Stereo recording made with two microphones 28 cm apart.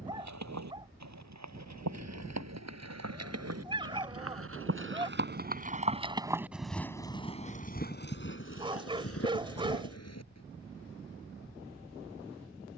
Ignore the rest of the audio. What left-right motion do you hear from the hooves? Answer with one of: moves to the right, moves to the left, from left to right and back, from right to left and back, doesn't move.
moves to the left.